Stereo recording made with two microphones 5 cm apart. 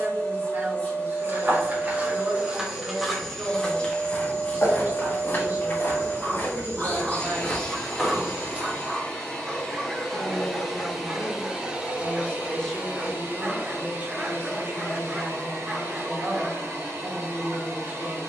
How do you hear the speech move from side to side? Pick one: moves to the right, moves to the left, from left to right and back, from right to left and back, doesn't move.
from right to left and back.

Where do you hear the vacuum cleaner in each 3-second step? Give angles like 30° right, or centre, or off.
30° left, 30° left, 30° left, centre, 50° right, 70° right.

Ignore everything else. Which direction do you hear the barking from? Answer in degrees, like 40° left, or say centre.
20° right.